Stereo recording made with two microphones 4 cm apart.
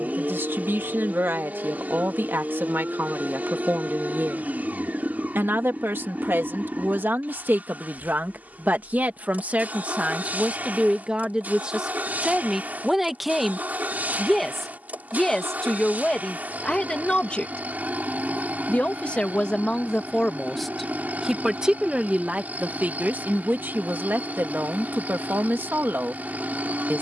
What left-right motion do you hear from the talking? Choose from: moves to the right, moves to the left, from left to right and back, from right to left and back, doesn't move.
from right to left and back.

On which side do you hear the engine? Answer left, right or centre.
right.